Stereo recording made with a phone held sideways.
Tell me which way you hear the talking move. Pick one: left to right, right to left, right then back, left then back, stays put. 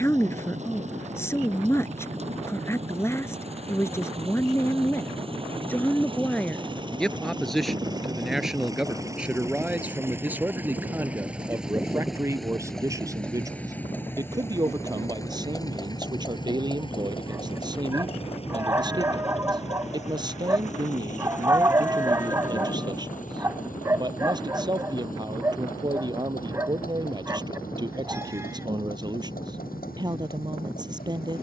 left to right.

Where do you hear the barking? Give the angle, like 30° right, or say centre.
20° right.